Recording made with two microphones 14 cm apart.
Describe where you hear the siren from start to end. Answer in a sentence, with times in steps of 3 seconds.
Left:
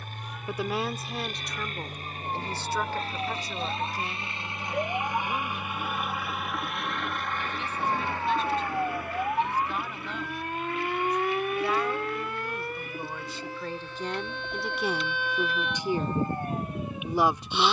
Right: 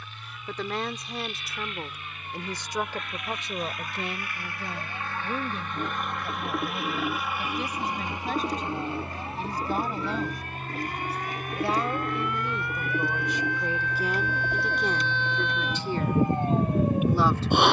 In this clip you hear the siren on the left from 0 s and on the right from 15 s.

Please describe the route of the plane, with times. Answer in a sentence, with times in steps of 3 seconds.
You can hear the plane on the left from 0 s, in the centre from 6 s and on the right from 9 s.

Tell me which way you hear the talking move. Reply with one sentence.
You can hear the talking move from left to right and back again.